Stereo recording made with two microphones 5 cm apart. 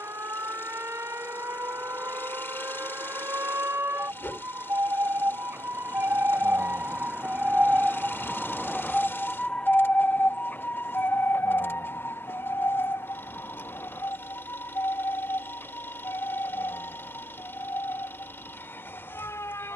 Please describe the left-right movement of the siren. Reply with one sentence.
In this clip you hear the siren move from right to left.